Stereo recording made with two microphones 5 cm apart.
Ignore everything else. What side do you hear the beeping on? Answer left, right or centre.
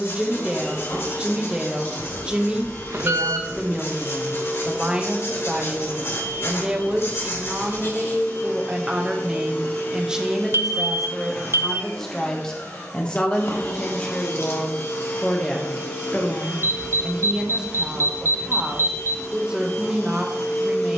right.